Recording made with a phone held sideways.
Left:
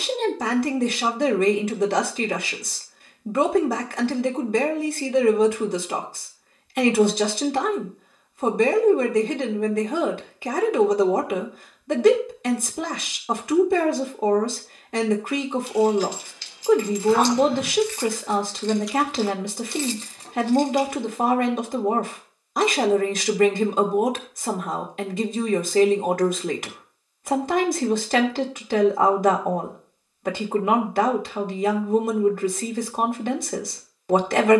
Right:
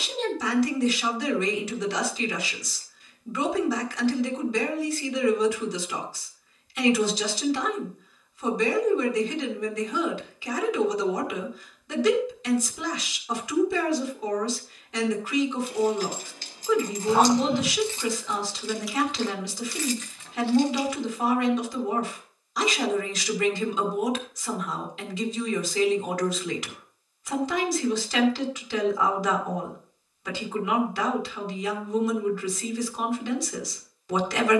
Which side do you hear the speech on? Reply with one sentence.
In this clip you hear the speech on the left.